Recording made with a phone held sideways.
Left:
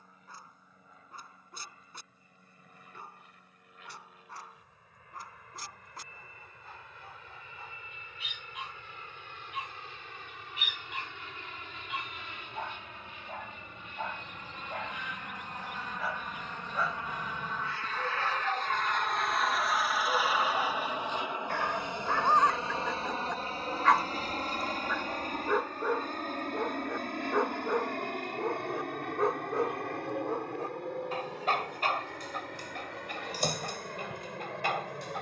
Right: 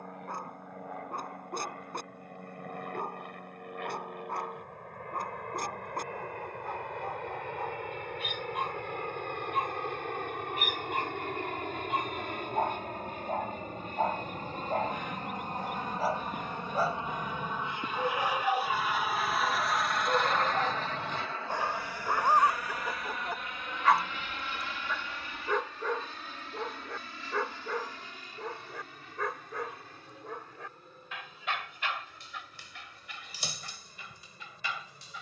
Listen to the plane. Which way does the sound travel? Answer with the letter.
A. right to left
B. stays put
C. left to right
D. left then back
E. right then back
A.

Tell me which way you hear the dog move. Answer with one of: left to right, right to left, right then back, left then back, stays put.
right to left.